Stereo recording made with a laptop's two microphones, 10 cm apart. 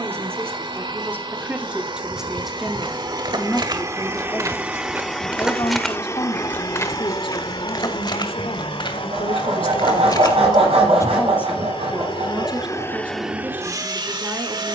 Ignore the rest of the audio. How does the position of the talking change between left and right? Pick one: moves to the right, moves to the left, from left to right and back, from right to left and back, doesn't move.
from right to left and back.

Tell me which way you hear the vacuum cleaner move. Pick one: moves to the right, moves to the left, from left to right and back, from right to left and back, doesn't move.
from right to left and back.